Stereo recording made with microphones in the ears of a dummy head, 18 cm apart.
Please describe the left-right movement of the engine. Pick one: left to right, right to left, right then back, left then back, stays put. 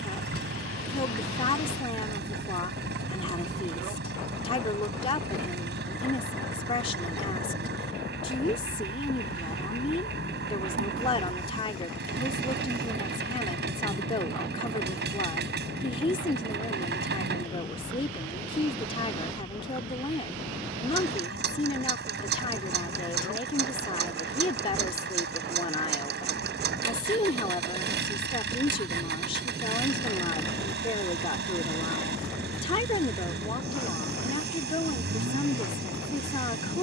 stays put.